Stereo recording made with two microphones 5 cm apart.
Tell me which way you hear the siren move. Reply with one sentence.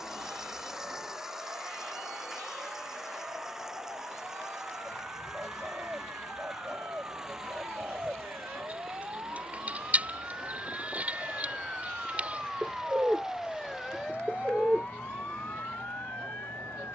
In this clip you hear the siren travel towards the left.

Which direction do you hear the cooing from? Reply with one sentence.
You can hear the cooing on the right.